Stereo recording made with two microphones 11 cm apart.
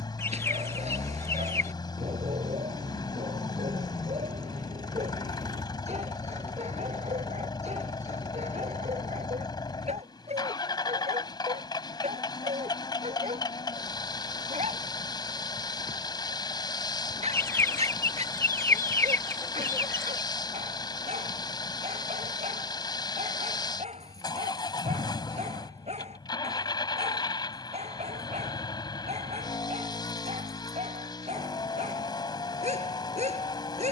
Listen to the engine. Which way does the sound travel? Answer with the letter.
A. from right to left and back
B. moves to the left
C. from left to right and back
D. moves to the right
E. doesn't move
E.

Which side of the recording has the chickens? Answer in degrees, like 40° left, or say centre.
20° left.